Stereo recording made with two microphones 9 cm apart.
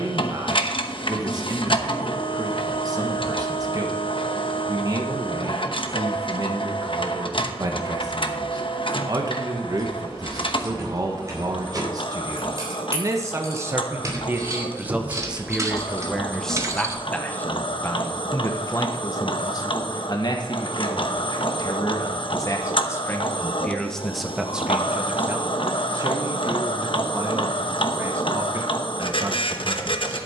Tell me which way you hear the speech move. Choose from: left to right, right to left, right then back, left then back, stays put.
left then back.